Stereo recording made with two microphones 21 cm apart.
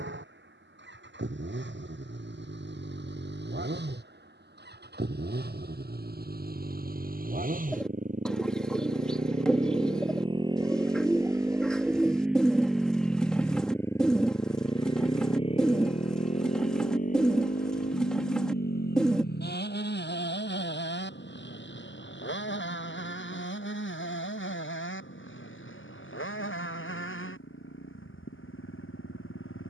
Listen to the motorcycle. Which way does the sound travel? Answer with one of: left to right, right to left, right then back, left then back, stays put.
right to left.